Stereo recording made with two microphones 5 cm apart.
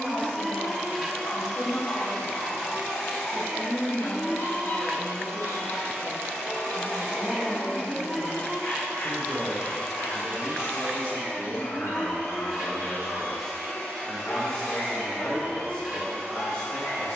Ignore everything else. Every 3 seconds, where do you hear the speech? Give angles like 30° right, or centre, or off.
30° left, 30° left, 10° left, 40° right, centre, 20° left.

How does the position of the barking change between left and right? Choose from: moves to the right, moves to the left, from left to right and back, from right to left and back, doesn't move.
doesn't move.